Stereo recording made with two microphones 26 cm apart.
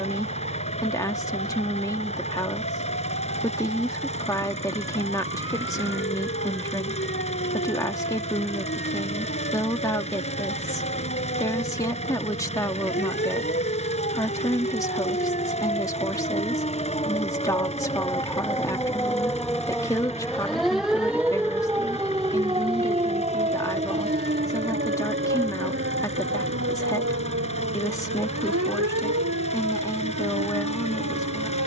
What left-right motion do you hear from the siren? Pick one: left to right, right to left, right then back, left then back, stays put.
left to right.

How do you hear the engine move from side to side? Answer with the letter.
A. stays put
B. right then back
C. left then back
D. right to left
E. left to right
A.